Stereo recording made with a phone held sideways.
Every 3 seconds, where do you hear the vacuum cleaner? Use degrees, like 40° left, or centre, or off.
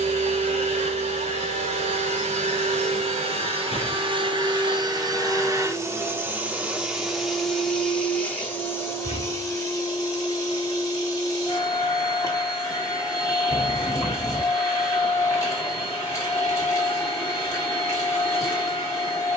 60° right, 40° right, centre, 20° left, 20° left, 20° left, 20° left.